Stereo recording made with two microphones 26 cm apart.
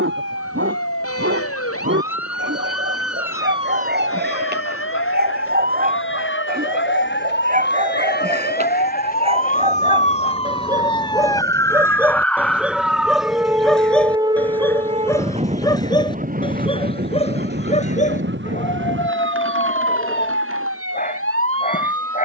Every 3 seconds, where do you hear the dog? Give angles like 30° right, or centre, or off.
50° right, 40° right, 30° right, 20° right, centre, 20° left, 30° left, 30° left.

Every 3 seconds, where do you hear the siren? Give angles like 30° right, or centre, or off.
60° left, 60° left, 40° left, 20° left, 10° right, 30° right, 50° right, 60° right.